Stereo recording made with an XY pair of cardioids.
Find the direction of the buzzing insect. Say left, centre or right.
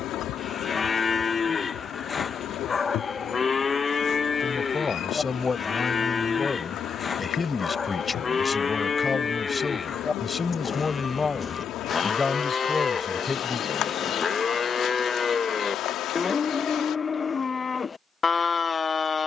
left.